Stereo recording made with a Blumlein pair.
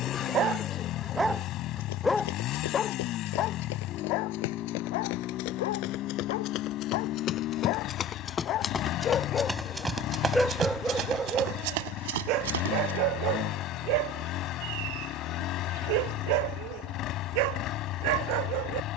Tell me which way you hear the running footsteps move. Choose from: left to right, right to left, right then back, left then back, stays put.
left to right.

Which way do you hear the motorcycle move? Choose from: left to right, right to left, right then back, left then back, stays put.
stays put.